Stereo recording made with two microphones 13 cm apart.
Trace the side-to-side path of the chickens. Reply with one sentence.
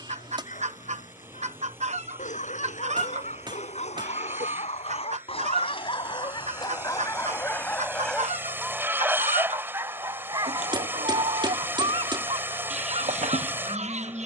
You can hear the chickens stay put.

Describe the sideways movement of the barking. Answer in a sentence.
In this clip you hear the barking move to the right.